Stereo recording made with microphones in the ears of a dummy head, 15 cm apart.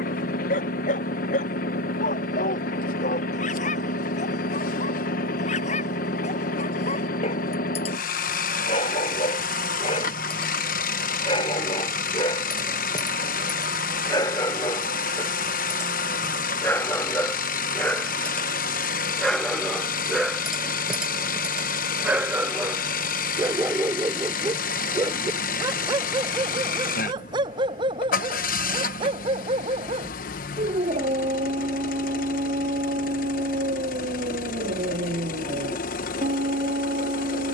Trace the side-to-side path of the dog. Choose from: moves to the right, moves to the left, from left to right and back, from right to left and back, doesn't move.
moves to the right.